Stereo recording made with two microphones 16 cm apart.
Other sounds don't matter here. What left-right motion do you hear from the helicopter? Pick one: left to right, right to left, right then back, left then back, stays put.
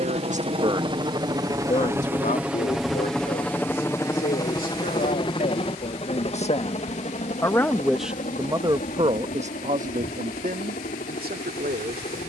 right to left.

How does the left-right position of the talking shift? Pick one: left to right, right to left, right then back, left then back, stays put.
left then back.